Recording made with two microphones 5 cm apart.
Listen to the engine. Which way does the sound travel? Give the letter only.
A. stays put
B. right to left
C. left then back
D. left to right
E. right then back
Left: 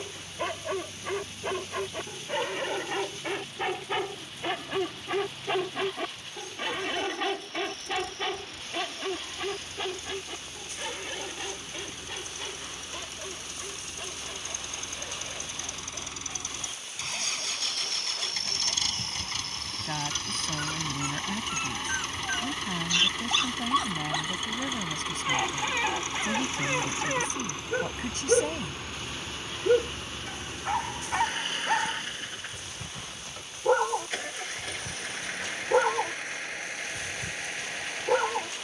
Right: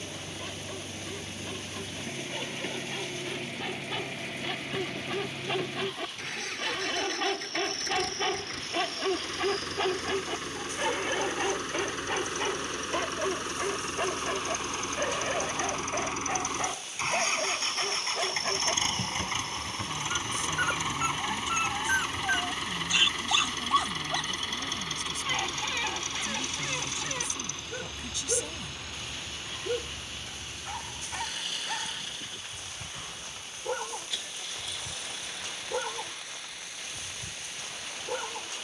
B.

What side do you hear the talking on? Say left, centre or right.
left.